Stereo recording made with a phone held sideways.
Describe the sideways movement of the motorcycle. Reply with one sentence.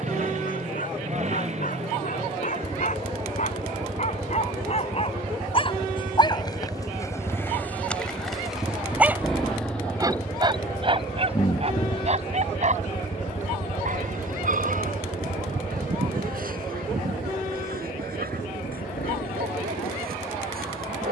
In this clip you hear the motorcycle travel towards the left.